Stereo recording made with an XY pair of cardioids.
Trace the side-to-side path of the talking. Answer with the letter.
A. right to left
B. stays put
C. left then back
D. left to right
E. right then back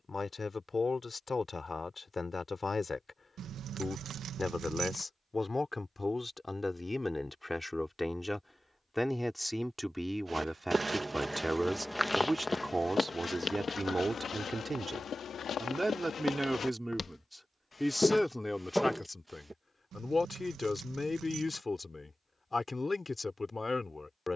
E.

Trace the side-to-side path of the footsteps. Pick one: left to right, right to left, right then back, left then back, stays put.
left then back.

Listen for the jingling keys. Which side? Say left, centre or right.
right.